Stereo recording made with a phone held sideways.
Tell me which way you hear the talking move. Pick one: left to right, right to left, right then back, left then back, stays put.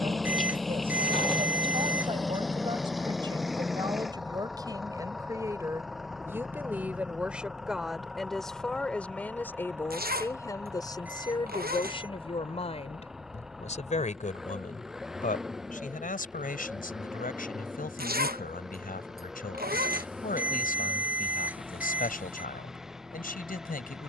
right to left.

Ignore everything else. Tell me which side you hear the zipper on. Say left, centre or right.
right.